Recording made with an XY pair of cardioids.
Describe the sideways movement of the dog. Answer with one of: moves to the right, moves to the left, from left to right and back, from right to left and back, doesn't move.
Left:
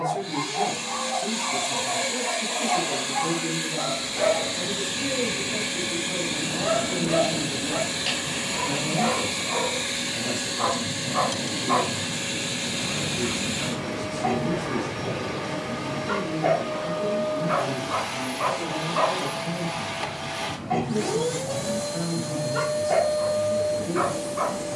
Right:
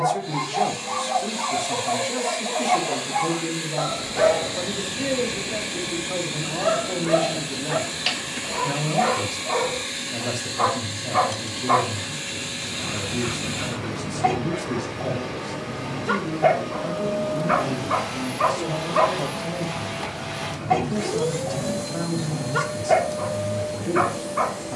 doesn't move.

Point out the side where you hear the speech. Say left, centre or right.
right.